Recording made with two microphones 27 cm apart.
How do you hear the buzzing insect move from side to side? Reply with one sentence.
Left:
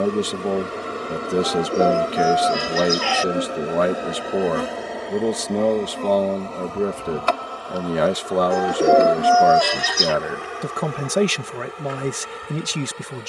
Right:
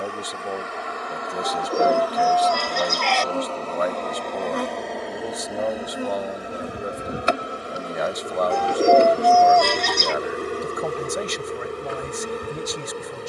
You can hear the buzzing insect go from the left side to the right.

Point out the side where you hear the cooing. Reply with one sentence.
In this clip you hear the cooing in the centre.